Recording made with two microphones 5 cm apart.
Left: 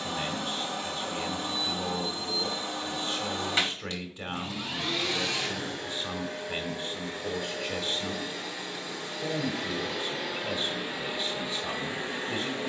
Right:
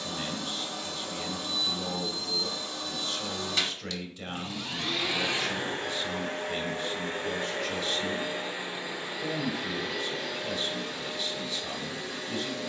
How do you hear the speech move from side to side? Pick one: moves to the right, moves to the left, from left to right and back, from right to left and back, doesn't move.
doesn't move.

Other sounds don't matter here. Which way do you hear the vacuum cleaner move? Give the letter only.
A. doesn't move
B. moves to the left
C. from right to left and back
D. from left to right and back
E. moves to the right
D.